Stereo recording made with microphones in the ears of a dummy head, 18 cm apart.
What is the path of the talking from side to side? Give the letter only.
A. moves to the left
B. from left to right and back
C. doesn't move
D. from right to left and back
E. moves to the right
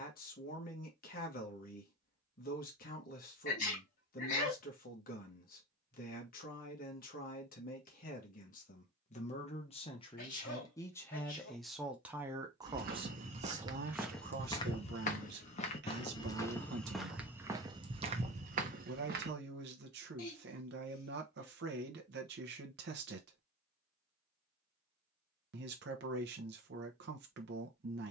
E.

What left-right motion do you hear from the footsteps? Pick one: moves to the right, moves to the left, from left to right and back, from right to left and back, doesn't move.
from right to left and back.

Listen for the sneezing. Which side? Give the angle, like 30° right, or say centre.
40° left.